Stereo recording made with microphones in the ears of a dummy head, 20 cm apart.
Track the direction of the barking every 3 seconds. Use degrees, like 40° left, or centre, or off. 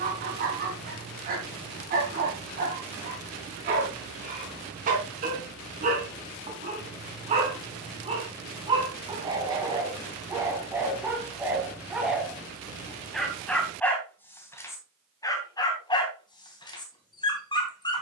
40° right, 40° right, 30° right, 10° right, centre, 20° left.